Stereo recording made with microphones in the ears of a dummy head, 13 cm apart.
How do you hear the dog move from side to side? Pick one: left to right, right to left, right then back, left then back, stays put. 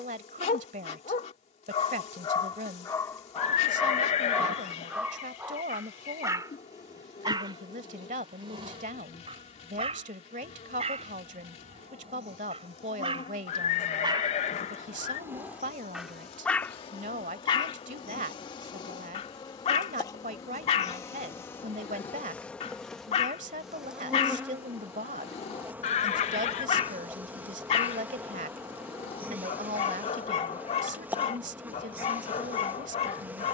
right then back.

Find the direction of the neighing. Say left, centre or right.
left.